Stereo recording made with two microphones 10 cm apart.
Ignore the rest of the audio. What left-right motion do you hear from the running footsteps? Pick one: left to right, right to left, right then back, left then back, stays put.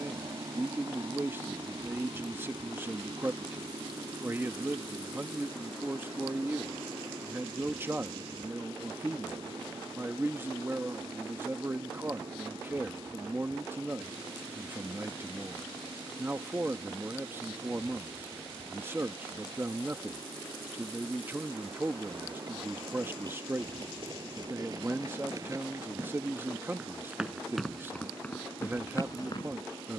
right to left.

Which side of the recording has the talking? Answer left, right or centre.
right.